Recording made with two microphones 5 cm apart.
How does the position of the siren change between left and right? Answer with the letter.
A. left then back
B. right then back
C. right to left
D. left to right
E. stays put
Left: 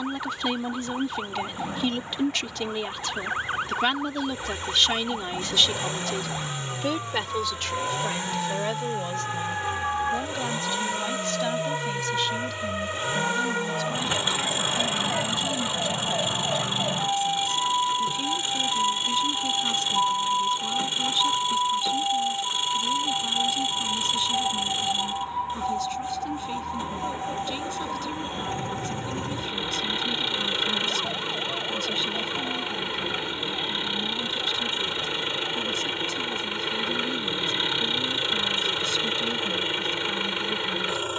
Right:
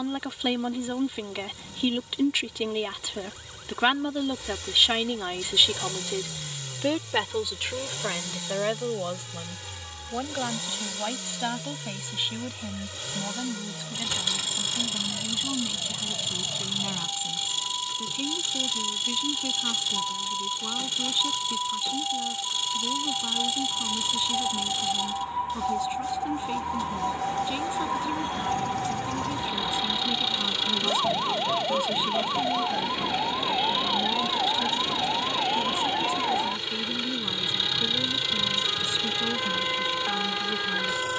D.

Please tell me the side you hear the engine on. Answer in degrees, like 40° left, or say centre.
30° left.